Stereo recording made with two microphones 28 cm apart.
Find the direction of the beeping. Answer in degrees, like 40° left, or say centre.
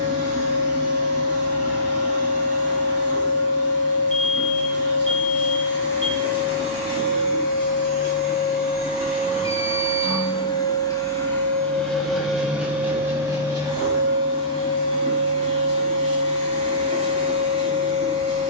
50° right.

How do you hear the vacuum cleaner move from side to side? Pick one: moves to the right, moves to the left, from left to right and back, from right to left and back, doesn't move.
moves to the right.